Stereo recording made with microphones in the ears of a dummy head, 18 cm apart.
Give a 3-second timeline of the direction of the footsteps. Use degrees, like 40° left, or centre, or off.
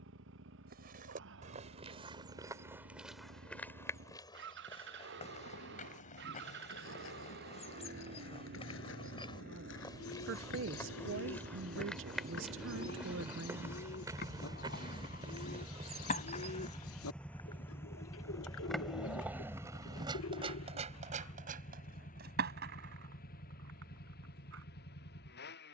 30° right, 20° left, 30° left, 20° left, 10° right, 30° right, off, off, off.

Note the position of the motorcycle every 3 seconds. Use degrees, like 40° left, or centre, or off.
70° right, 60° right, 60° right, 50° right, 30° right, centre, 30° left, 40° left, 50° left.